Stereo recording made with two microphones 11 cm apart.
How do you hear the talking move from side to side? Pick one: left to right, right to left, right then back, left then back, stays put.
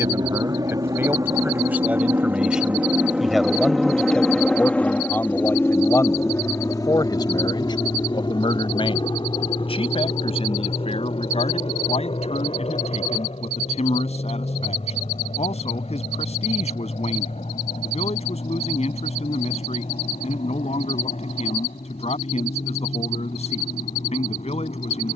right to left.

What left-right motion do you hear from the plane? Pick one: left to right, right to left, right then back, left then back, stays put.
right to left.